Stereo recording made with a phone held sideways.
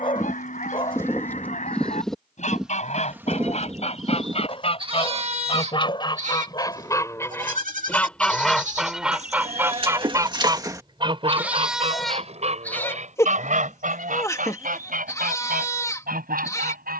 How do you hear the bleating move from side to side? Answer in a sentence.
You can hear the bleating go right and come back.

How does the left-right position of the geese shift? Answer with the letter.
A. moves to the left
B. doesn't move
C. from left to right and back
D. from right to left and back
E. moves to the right
E.